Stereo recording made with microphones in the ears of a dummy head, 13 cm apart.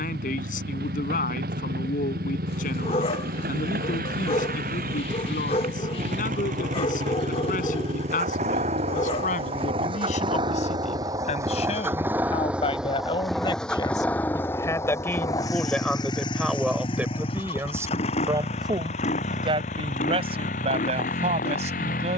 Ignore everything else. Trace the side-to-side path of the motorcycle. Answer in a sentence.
In this clip you hear the motorcycle move from right to left.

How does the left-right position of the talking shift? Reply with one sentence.
In this clip you hear the talking move from left to right.